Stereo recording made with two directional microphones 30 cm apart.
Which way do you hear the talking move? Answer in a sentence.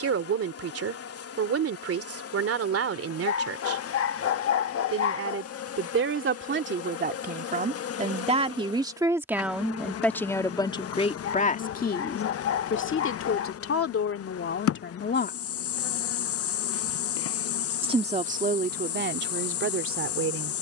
You can hear the talking go left and come back.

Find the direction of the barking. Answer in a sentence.
In this clip you hear the barking on the left.